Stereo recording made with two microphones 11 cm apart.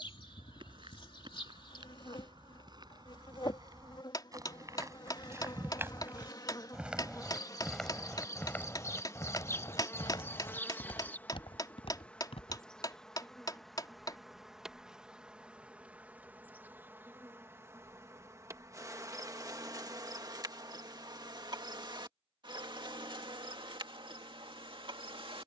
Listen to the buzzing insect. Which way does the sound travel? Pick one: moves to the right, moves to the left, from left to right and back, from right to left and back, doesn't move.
moves to the right.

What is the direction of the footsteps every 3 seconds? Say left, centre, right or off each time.
right, right, centre, left, left, off, off, off, off.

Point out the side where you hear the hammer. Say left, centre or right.
left.